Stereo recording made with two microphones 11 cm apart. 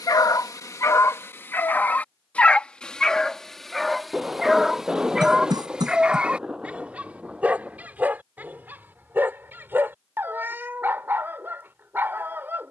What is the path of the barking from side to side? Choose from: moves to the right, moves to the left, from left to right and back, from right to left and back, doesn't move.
moves to the right.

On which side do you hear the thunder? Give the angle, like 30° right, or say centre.
10° right.